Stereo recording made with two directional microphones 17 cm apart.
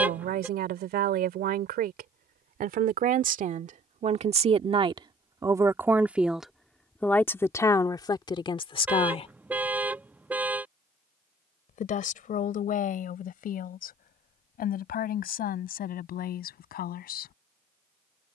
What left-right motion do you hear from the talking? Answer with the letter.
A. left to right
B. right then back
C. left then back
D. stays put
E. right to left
E.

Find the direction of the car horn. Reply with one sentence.
In this clip you hear the car horn in the centre.